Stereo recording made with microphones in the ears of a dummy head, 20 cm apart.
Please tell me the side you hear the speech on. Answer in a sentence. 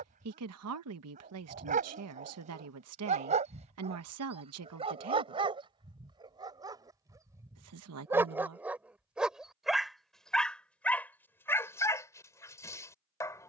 In this clip you hear the speech on the right.